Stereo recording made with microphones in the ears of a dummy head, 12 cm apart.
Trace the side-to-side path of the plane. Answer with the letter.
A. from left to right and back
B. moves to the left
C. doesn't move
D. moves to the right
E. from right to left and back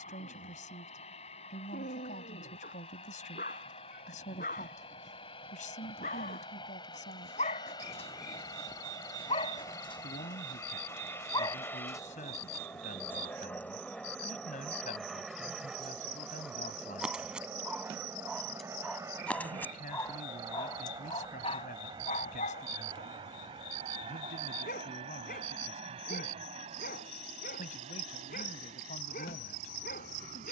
D.